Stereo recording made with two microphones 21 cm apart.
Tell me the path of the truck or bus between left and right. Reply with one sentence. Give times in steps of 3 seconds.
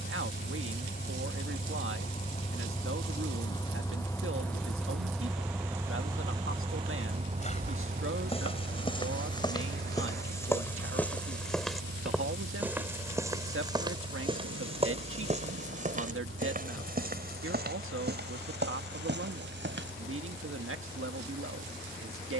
You can hear the truck or bus on the left from 0 s, in the centre from 3 s and on the right from 6 s.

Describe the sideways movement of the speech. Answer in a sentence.
In this clip you hear the speech stay put.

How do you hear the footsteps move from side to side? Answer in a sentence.
You can hear the footsteps move from left to right.